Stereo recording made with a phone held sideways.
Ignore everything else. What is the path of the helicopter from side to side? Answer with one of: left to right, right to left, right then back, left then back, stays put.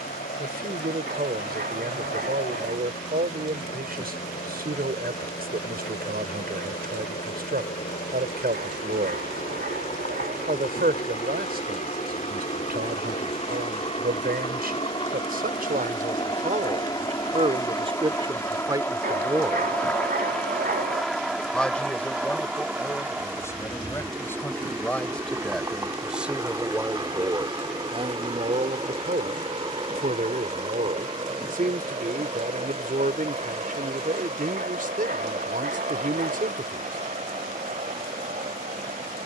left to right.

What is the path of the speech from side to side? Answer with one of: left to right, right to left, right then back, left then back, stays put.
left then back.